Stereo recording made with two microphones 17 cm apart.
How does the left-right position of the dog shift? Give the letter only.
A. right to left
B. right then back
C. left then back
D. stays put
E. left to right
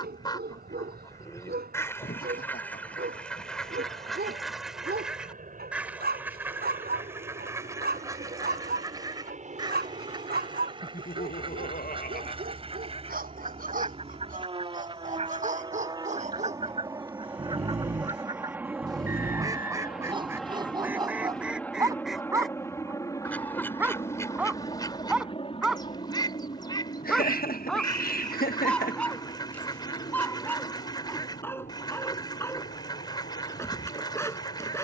A.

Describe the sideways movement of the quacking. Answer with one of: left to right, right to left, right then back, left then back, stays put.
right then back.